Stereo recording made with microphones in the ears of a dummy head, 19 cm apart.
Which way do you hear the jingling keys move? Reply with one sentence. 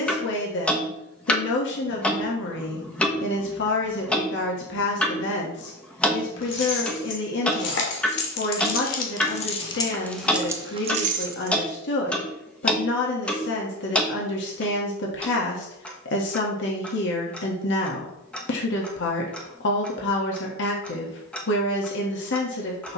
You can hear the jingling keys move to the right.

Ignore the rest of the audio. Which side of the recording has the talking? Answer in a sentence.
You can hear the talking on the left.